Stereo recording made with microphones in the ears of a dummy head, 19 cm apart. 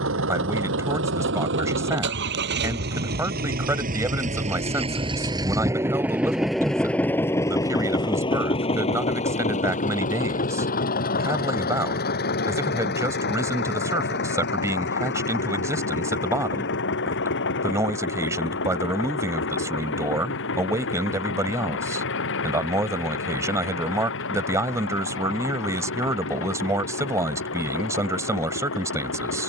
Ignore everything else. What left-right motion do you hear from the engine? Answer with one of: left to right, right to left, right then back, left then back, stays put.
right to left.